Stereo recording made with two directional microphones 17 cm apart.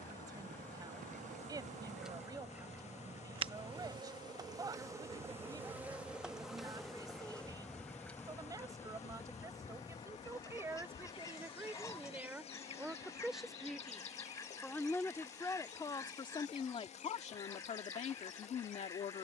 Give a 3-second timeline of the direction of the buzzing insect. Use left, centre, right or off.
right, right, centre, left, left, left, left.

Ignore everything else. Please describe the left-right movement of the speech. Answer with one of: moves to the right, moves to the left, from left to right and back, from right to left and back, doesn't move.
moves to the left.